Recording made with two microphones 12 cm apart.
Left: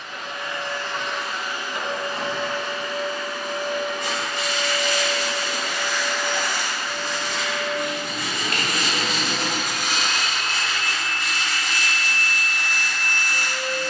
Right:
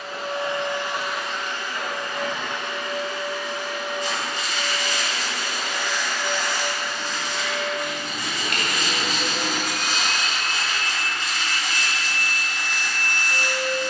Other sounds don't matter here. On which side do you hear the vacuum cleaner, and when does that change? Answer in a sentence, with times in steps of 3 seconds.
You can hear the vacuum cleaner in the centre from 0 s, on the left from 3 s, in the centre from 9 s and on the right from 12 s.